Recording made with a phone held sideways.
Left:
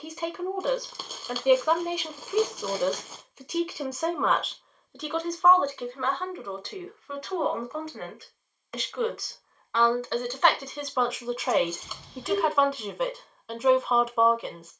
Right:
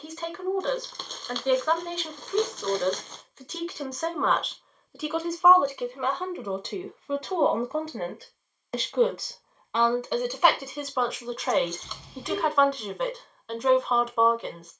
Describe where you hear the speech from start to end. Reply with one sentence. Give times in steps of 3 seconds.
You can hear the speech in the centre from 0 s, on the right from 6 s and in the centre from 9 s.